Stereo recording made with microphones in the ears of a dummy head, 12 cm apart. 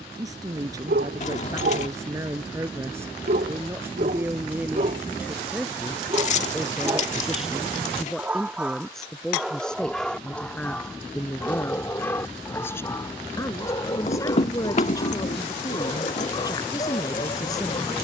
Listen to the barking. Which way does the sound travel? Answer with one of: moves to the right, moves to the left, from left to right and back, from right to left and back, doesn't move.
moves to the left.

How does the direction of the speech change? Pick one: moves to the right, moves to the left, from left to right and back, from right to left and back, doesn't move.
moves to the left.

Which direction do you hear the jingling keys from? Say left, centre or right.
left.